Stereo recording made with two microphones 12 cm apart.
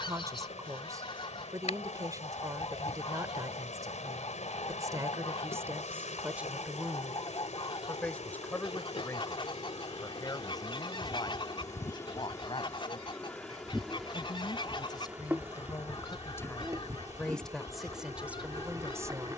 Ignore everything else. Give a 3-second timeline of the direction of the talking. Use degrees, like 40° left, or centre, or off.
30° right, 30° right, centre, 30° left, 40° left, 20° left, 20° right.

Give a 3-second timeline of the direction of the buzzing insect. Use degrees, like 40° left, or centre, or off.
70° left, 70° left, 60° left, 40° left, 10° left, 20° right, 30° right.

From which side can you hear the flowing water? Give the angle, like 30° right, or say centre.
80° left.